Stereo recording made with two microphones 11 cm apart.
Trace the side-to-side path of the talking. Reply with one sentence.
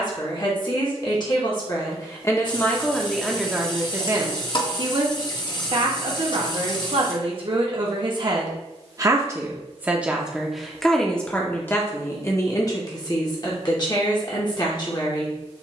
You can hear the talking go right and come back.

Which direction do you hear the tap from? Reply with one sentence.
In this clip you hear the tap on the left.